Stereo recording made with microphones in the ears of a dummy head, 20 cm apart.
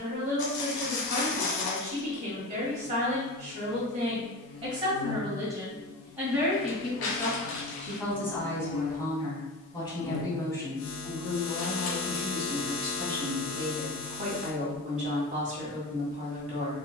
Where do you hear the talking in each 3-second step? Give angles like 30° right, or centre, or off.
40° right, 30° right, centre, 10° left, 20° right, 30° right.